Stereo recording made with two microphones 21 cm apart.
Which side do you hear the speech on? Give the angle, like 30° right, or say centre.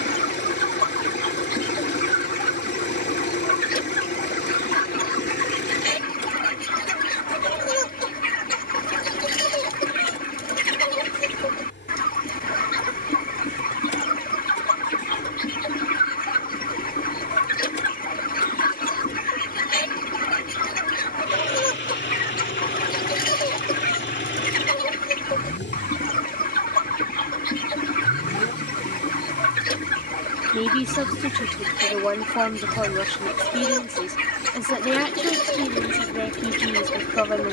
centre.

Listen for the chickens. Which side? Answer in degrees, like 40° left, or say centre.
40° left.